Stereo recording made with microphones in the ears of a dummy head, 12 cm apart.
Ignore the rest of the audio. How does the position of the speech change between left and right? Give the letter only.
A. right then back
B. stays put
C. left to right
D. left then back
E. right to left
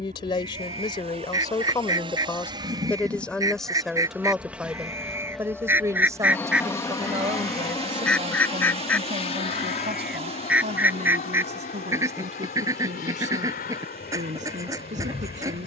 C.